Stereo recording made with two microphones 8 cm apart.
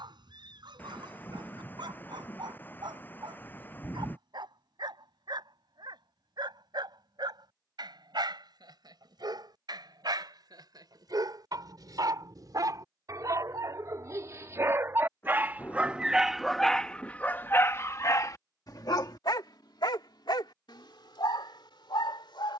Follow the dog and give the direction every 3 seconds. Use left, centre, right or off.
right, right, right, right, right, centre, left, left.